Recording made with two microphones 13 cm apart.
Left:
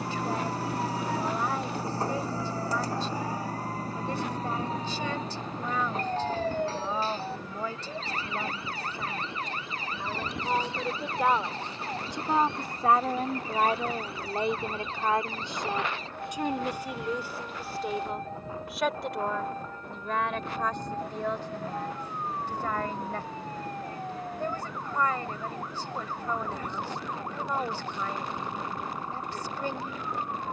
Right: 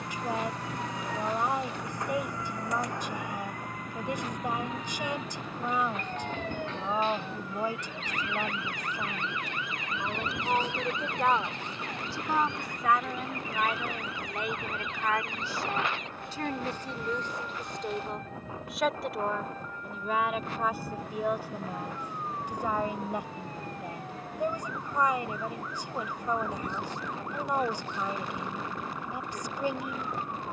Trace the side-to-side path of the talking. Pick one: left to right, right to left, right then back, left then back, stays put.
left then back.